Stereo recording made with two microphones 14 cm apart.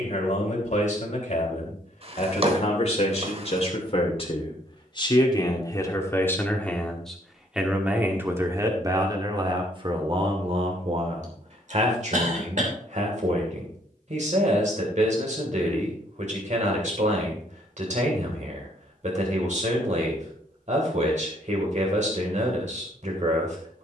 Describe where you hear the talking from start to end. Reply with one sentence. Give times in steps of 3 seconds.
In this clip you hear the talking on the left from 0 s, in the centre from 6 s and on the right from 9 s.